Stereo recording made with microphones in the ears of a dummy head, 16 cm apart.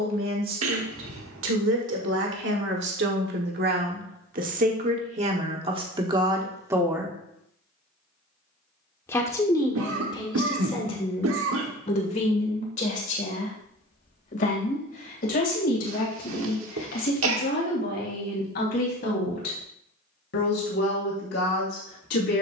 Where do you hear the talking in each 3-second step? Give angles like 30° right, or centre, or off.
70° right, 40° right, 20° right, 20° left, 40° left, 50° left, 50° left, 60° left.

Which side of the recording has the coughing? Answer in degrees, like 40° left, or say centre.
80° right.